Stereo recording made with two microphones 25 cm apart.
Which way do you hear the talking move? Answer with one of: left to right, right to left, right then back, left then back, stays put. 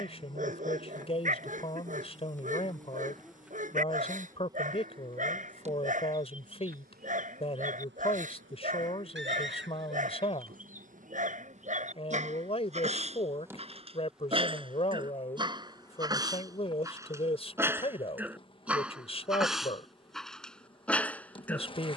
stays put.